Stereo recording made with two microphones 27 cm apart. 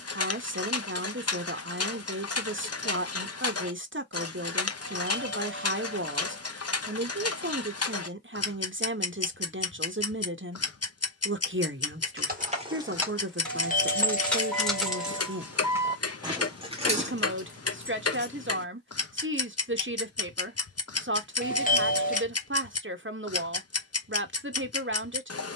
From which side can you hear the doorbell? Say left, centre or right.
left.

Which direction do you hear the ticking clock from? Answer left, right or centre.
left.